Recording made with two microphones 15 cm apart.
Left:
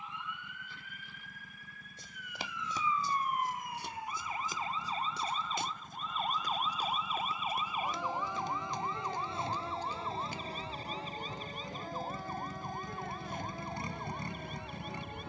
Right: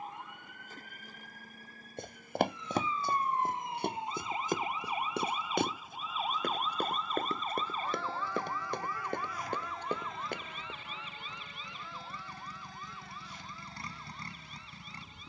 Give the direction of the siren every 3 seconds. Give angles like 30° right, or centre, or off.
40° right, 20° right, 10° left, 30° left, 50° left.